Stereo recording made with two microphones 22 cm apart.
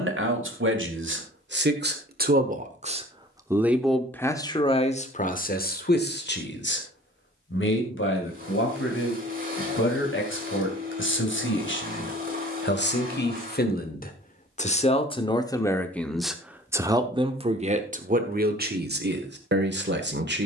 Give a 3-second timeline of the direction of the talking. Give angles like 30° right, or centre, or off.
50° right, 20° left, 60° left, 60° left, 50° left, 10° right, 50° right.